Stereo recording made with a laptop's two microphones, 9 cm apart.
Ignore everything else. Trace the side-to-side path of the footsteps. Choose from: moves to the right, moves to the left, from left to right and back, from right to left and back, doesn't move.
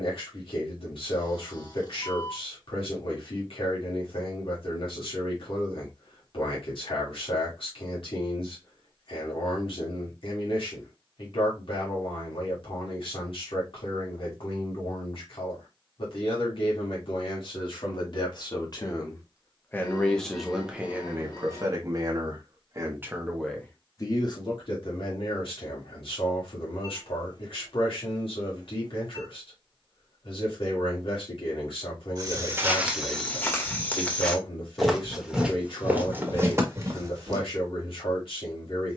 from right to left and back.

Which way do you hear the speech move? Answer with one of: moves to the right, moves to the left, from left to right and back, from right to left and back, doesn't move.
from left to right and back.